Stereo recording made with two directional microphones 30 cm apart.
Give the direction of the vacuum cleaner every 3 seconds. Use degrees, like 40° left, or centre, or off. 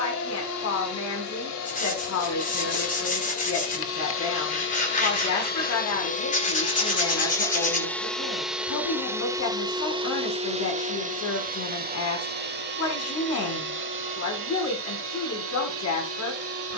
60° left, 40° left, 10° left, 20° right, 40° right, 50° right.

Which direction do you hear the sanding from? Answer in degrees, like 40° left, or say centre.
30° left.